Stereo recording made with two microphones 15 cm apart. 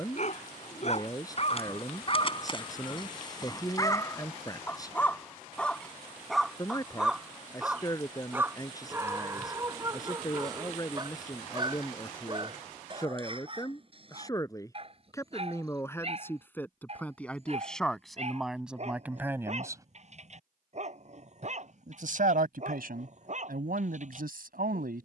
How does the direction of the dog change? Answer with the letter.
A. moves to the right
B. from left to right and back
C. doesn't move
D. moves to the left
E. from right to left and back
A.